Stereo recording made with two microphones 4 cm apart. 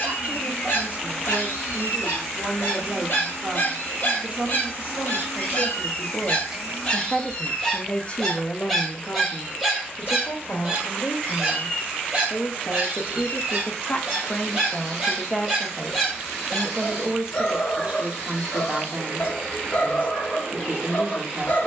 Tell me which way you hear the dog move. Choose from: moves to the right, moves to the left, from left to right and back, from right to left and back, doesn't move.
from left to right and back.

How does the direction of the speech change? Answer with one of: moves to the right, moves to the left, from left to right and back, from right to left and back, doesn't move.
from right to left and back.